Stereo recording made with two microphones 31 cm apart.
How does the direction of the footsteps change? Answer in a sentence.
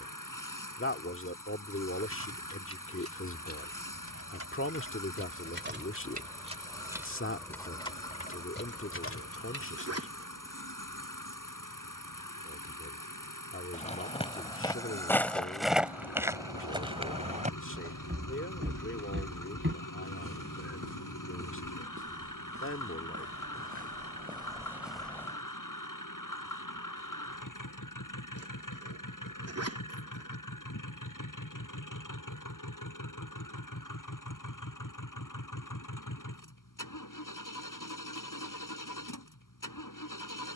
In this clip you hear the footsteps move from left to right and back again.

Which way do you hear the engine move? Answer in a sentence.
In this clip you hear the engine stay put.